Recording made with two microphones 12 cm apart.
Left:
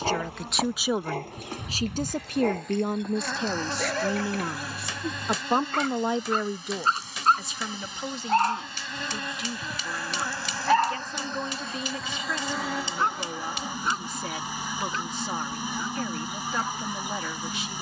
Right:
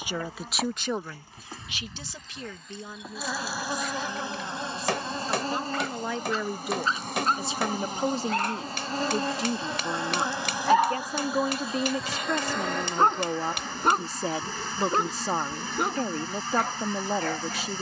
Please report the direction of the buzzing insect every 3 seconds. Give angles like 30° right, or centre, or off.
10° left, 20° right, 50° right, 20° right, 10° left, 10° left.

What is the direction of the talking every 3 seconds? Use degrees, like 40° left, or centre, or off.
30° left, 70° left, 20° right, 40° right, 40° right, 40° right.